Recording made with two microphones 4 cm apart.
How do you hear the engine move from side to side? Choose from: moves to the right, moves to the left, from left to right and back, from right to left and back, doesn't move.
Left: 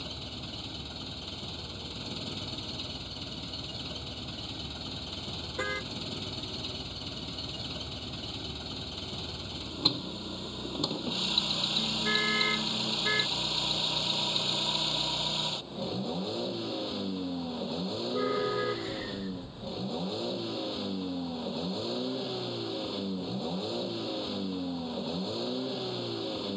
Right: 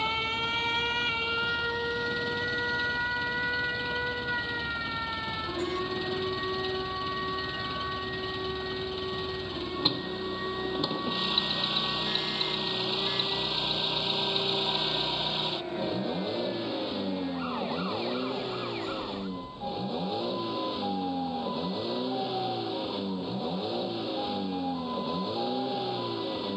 doesn't move.